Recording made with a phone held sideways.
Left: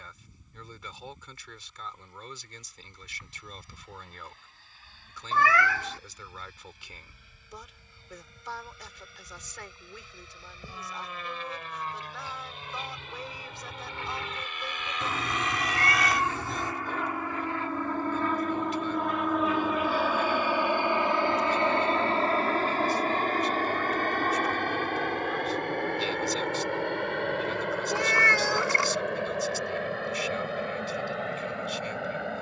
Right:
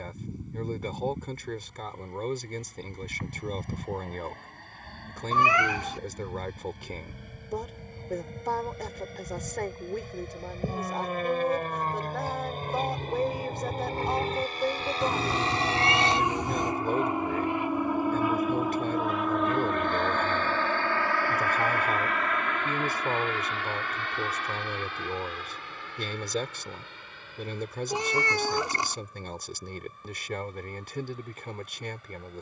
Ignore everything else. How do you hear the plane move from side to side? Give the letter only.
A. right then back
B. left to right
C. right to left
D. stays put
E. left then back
C.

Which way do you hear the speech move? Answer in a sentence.
In this clip you hear the speech stay in one place.